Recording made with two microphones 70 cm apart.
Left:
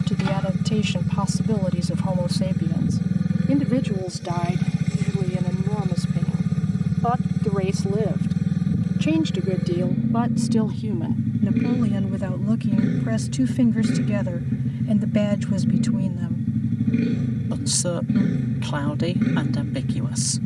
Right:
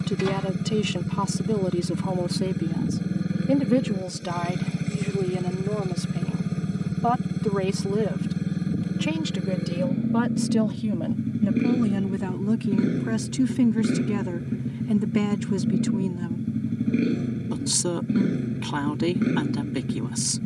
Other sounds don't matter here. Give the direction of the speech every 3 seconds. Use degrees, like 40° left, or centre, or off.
20° left, 40° right, 50° right, 20° right, 10° left, 10° left, 10° left.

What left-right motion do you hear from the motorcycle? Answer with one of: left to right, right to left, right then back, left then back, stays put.
stays put.